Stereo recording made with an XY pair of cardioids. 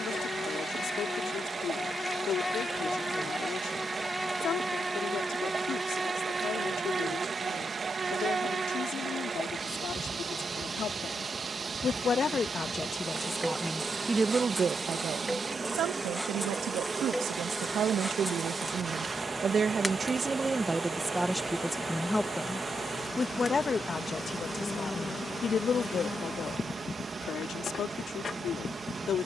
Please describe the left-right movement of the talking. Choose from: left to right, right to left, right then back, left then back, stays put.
right then back.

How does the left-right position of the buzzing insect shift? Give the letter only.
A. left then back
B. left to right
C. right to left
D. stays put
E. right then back
E.